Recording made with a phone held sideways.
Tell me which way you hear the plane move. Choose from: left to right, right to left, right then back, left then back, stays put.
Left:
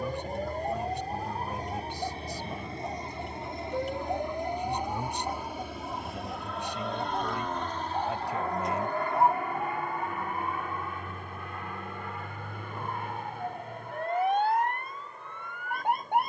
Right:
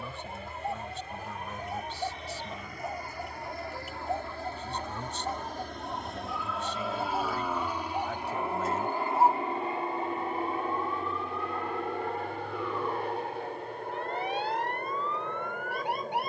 left to right.